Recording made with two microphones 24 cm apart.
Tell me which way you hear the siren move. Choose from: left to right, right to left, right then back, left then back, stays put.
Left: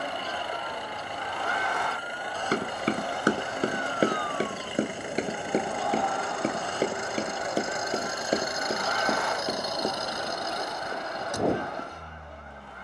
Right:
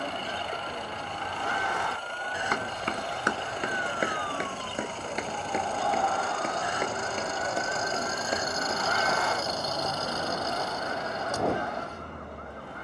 left to right.